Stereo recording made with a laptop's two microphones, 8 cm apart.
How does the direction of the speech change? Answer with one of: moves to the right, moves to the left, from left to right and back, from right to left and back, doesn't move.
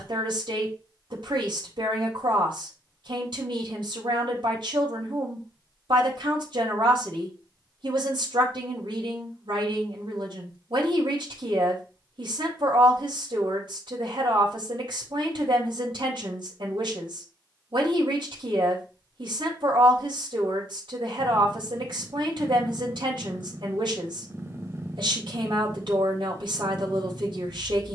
doesn't move.